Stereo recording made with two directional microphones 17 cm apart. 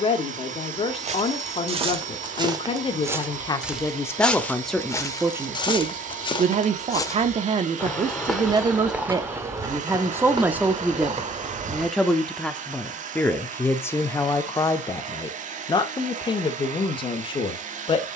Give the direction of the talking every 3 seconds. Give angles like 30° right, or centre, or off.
30° left, 10° left, 30° right, 10° right, 10° left, 30° left.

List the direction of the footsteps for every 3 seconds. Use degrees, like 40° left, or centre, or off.
30° right, 10° left, 10° left, 30° right, off, off.